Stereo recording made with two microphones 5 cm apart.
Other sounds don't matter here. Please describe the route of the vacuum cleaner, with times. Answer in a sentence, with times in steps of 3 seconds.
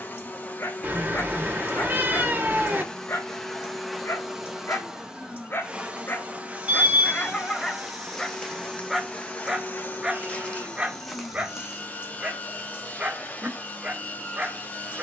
In this clip you hear the vacuum cleaner on the left from 0 s, in the centre from 3 s, on the right from 6 s and on the left from 9 s.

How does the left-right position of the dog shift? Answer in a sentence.
You can hear the dog move to the right.